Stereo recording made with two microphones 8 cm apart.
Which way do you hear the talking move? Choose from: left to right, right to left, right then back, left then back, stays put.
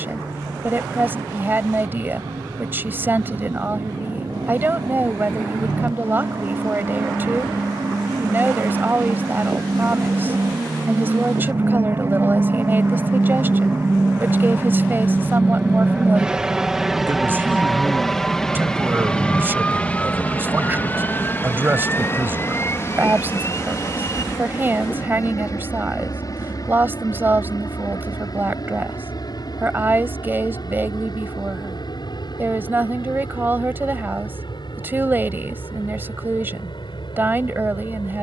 stays put.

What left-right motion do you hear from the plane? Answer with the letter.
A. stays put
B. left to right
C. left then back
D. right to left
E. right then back
D.